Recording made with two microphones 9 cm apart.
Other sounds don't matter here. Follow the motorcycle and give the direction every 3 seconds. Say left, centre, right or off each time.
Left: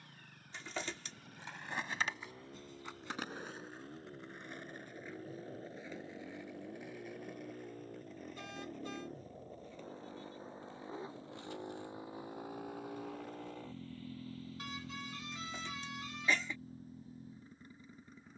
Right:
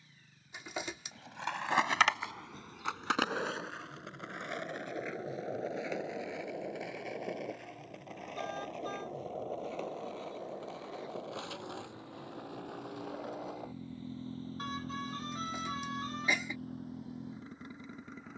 left, left, left, left, centre, right.